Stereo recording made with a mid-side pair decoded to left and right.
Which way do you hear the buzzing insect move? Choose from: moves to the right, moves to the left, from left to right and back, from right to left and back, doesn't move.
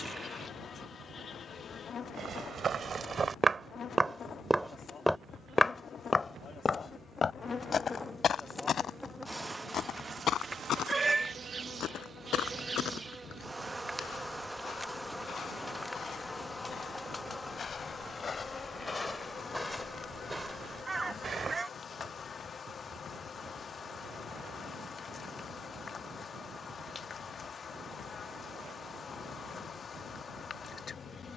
from left to right and back.